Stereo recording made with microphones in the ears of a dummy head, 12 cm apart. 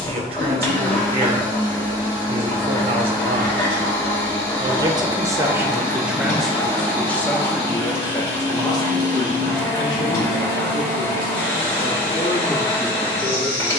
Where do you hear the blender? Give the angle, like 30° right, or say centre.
40° left.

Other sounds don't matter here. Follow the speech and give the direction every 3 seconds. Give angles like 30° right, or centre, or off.
50° right, 30° right, 10° left, 40° left, 40° left.